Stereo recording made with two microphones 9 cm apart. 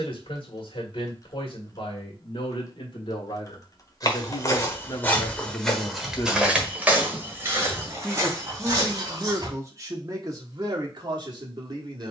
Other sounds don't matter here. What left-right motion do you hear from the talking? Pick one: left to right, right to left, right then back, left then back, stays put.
left to right.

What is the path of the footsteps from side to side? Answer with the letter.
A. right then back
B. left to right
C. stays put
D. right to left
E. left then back
B.